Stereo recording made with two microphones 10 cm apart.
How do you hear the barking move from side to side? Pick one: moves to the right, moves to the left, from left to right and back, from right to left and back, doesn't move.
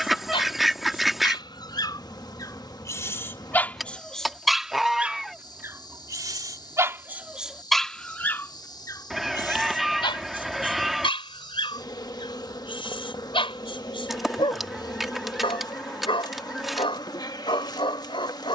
from left to right and back.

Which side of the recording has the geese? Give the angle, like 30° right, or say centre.
centre.